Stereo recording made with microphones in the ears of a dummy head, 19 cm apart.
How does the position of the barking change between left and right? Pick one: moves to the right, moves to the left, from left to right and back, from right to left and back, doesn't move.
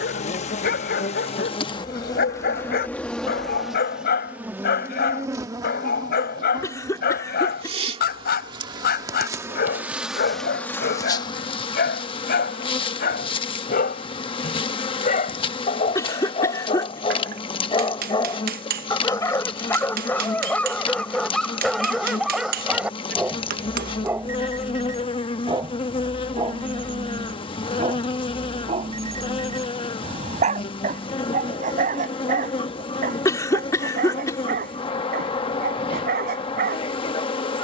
moves to the right.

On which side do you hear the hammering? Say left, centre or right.
right.